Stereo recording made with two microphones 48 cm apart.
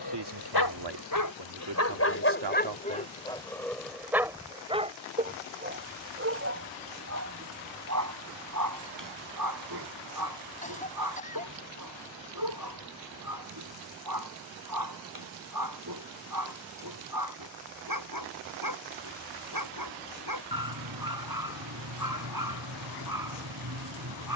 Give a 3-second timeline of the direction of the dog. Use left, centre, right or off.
left, centre, right, right, right, right, right, right.